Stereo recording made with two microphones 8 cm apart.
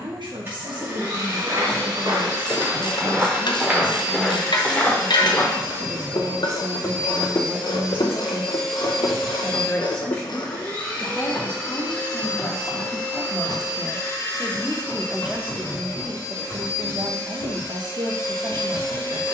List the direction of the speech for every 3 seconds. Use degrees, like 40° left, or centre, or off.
80° right, 80° right, 30° right, 20° left, 10° left, 40° right, 70° right.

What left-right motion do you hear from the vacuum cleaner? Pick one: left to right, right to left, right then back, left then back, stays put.
right to left.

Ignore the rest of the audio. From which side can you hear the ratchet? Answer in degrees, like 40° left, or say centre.
70° left.